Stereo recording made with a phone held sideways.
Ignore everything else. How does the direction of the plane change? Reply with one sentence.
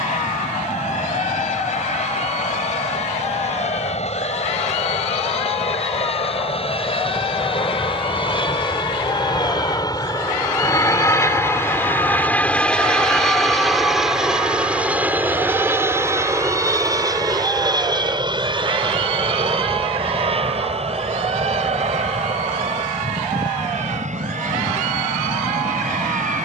You can hear the plane travel towards the right.